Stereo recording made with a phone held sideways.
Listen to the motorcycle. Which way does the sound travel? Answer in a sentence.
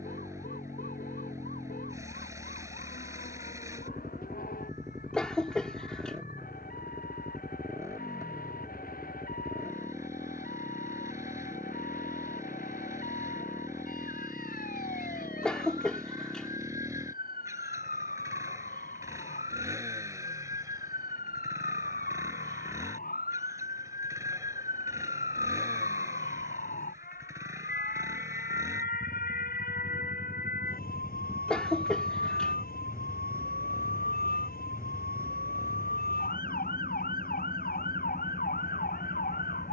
In this clip you hear the motorcycle stay put.